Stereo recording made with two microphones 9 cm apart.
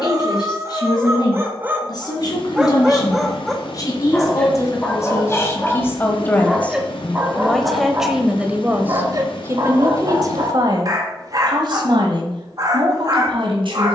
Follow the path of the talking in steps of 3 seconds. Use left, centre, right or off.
left, left, centre, right, right.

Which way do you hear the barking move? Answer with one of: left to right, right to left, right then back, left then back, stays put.
left then back.